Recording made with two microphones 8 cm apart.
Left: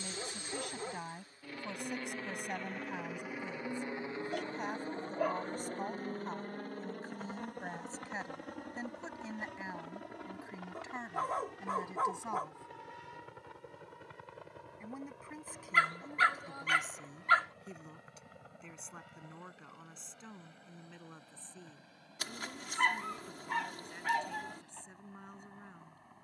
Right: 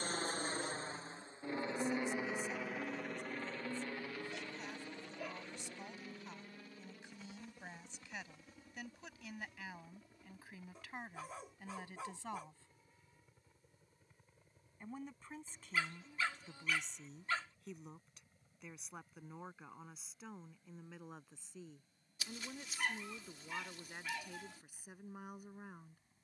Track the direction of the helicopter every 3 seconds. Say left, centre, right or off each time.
right, left, left, left, left, left, left, left, left.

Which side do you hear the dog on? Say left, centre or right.
left.